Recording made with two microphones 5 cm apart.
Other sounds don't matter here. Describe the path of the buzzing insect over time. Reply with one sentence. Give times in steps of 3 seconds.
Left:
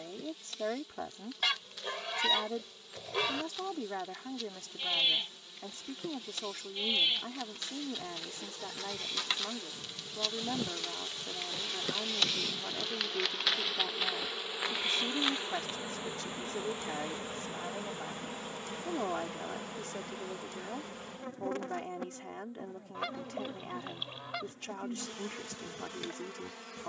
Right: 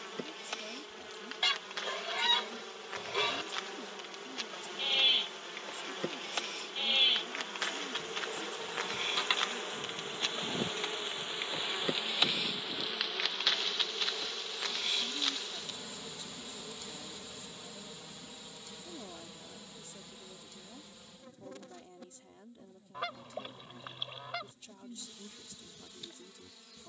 You can hear the buzzing insect on the right from 0 s, in the centre from 12 s and on the left from 15 s.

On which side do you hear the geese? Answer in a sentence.
In this clip you hear the geese in the centre.